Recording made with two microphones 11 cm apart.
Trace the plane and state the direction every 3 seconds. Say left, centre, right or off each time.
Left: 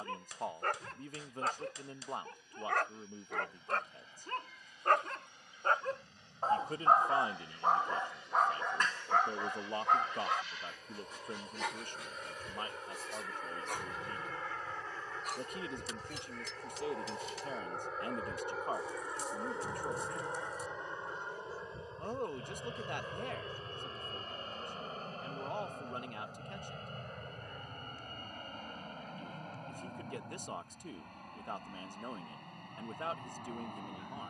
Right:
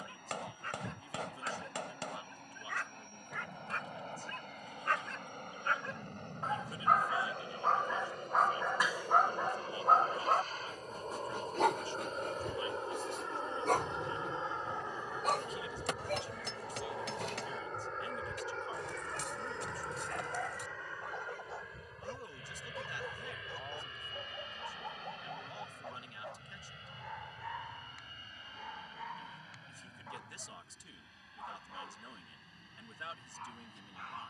right, right, right, right, right, centre, centre, left, left, left, left, left.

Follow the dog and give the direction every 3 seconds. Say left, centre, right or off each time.
left, left, centre, right, right, right, right, right, right, right, right, right.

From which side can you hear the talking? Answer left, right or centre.
left.